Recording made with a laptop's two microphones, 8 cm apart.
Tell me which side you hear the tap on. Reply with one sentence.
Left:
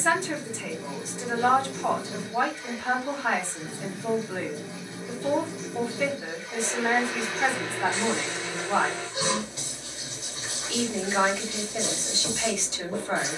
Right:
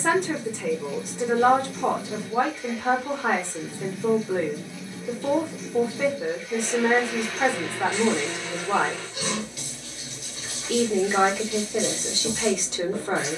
In this clip you hear the tap on the left.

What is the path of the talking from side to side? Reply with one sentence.
You can hear the talking stay in one place.